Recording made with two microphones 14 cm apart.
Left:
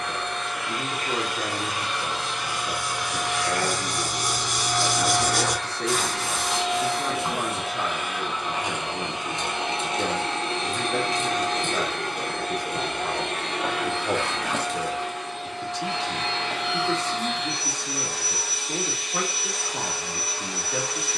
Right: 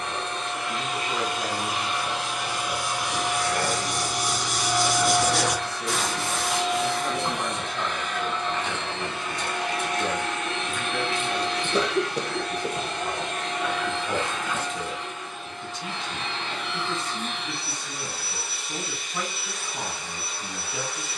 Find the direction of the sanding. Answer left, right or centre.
centre.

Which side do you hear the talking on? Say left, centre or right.
left.